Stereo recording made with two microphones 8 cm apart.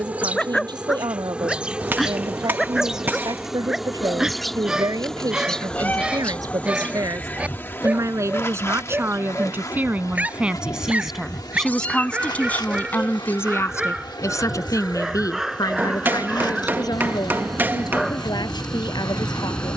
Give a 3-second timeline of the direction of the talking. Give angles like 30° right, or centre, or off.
70° right, 60° right, 50° right, 10° right, 30° left, 60° left, 70° left.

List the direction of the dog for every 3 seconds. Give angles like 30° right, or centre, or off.
centre, 10° right, 20° right, 20° right, 10° right, centre, 10° left.